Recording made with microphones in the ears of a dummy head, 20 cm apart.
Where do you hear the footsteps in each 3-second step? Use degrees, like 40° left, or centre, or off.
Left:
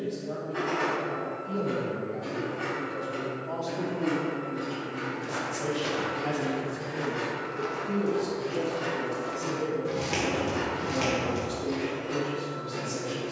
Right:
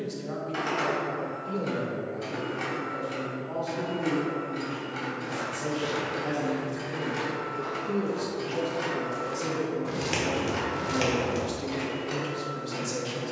off, 60° left, 40° left, 20° right, off.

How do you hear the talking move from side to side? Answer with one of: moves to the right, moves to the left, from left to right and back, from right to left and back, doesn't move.
from right to left and back.